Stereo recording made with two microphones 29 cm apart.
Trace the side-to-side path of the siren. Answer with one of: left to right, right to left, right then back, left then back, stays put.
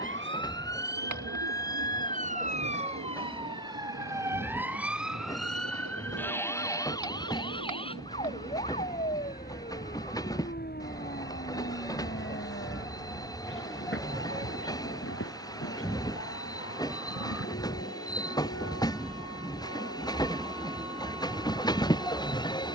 right to left.